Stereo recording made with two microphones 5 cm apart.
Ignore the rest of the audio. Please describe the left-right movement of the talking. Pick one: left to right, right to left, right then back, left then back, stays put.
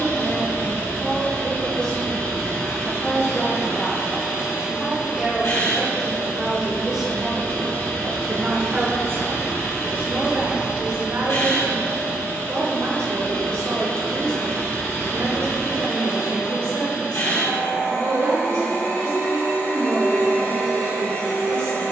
left to right.